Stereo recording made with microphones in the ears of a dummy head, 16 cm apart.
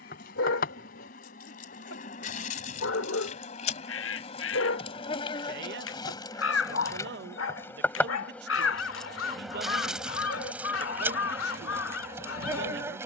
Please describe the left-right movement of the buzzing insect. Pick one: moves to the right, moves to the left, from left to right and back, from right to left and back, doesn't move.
moves to the right.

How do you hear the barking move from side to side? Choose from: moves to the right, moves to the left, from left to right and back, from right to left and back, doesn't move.
doesn't move.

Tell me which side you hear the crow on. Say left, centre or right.
left.